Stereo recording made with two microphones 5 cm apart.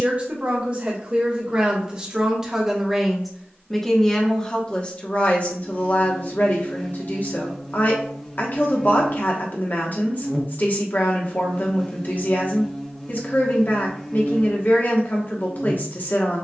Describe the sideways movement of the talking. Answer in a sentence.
You can hear the talking move from right to left.